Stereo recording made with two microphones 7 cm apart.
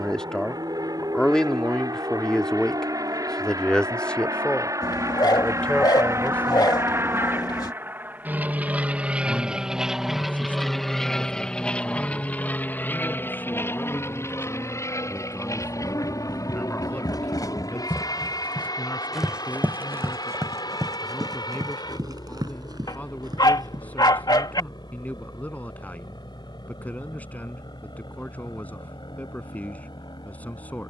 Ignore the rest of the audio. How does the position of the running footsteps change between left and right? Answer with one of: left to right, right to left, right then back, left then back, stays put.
left to right.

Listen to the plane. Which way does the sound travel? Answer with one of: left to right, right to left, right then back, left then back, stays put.
right to left.